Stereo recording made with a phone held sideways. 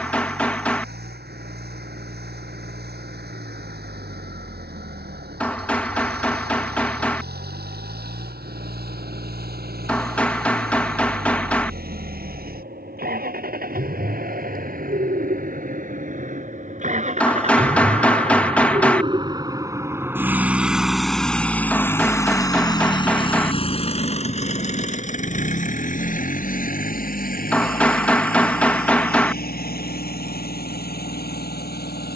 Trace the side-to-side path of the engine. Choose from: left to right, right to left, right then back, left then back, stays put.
right to left.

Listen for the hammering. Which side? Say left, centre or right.
centre.